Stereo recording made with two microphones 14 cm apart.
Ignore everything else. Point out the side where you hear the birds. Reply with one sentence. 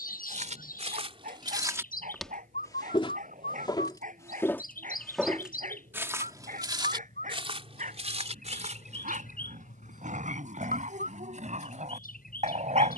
You can hear the birds on the left.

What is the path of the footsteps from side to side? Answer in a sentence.
In this clip you hear the footsteps go left and come back.